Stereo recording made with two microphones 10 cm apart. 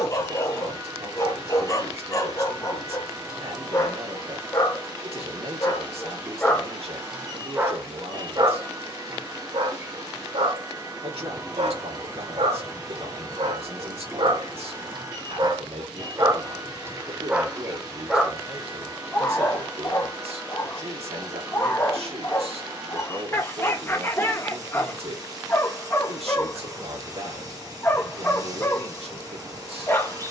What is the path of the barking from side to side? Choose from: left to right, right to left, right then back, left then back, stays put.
right then back.